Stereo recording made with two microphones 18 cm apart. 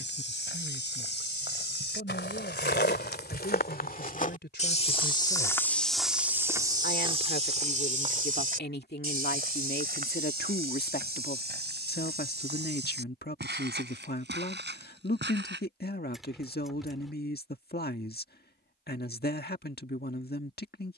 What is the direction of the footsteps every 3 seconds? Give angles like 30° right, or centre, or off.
70° left, 40° left, 30° right, 60° right, 70° right, 70° right, off.